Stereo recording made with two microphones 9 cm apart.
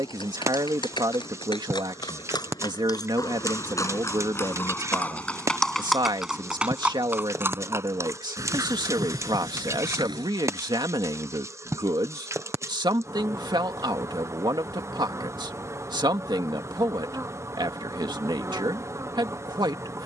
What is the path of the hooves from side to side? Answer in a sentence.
You can hear the hooves move from left to right.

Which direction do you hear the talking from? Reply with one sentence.
In this clip you hear the talking on the right.